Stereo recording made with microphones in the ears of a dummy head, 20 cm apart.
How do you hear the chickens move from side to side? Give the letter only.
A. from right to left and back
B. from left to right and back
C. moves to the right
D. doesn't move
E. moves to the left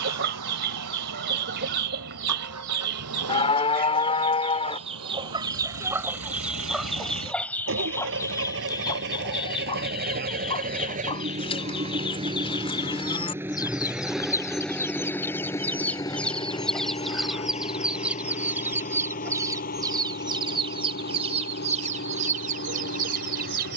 A.